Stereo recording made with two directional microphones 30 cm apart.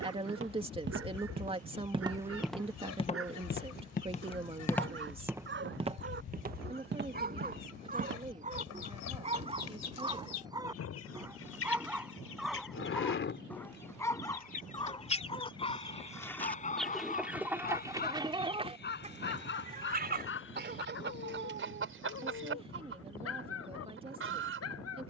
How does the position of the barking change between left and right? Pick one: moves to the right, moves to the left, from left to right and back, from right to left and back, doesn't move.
moves to the left.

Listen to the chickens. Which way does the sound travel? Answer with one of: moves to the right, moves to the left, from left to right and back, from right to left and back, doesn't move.
moves to the right.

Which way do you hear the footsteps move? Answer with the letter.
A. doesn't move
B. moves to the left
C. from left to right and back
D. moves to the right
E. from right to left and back
E.